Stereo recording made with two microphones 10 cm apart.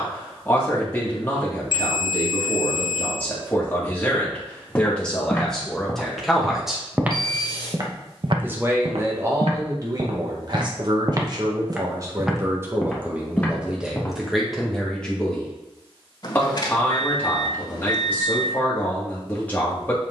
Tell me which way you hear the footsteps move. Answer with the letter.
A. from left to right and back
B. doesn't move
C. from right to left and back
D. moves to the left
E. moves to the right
A.